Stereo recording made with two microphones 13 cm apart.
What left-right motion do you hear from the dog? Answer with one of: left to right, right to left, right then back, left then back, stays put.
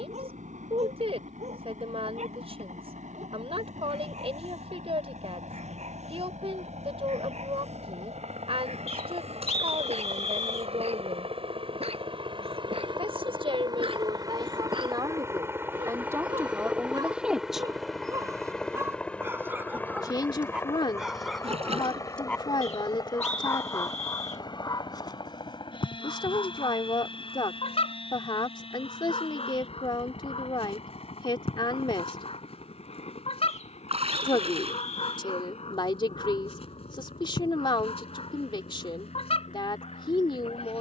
right to left.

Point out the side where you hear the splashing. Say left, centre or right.
right.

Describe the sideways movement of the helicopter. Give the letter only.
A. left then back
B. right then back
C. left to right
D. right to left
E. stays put
D.